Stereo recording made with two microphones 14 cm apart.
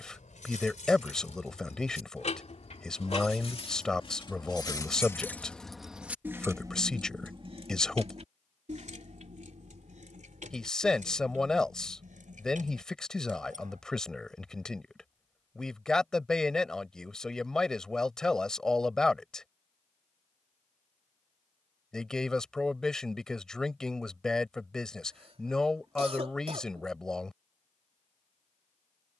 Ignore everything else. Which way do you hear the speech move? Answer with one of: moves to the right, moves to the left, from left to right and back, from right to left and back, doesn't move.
doesn't move.